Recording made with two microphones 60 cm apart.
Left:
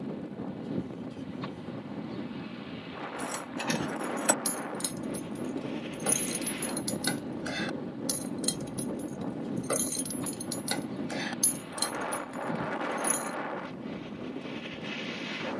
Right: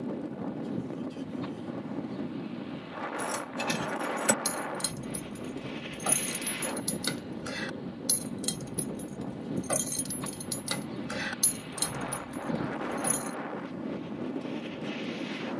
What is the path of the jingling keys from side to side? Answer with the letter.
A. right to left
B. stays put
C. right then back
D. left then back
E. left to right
D.